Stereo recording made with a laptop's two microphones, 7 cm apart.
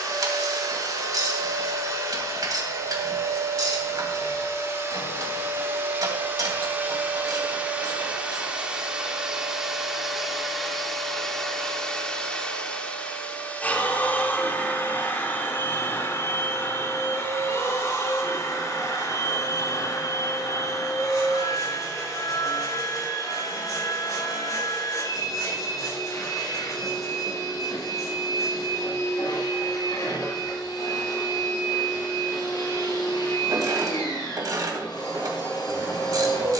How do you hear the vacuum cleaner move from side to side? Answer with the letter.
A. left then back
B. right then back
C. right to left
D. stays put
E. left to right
C.